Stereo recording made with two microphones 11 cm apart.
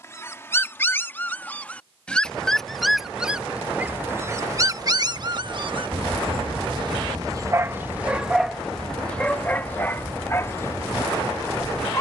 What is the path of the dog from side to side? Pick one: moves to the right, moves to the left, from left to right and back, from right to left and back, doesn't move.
from left to right and back.